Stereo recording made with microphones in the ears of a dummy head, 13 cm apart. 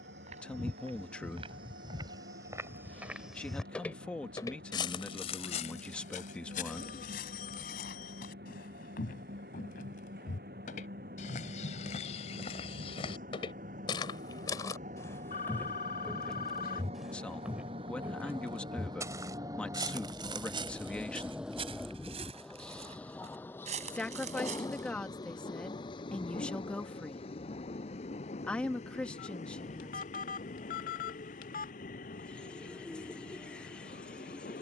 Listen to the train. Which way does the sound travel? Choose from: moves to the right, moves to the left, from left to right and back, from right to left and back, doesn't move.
moves to the left.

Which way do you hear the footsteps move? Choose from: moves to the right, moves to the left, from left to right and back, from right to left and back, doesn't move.
from right to left and back.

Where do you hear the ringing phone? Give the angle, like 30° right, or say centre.
60° left.